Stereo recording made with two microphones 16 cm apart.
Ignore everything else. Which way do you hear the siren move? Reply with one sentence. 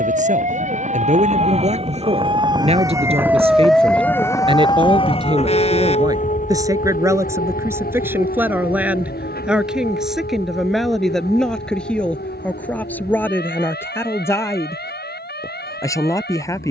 You can hear the siren travel towards the left.